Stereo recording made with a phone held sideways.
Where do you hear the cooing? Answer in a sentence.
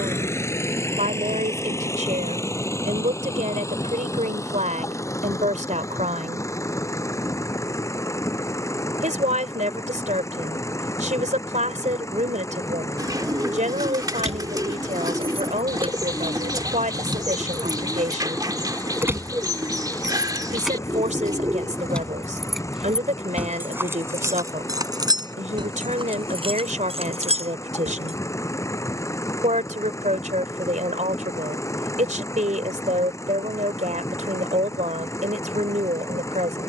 You can hear the cooing on the right.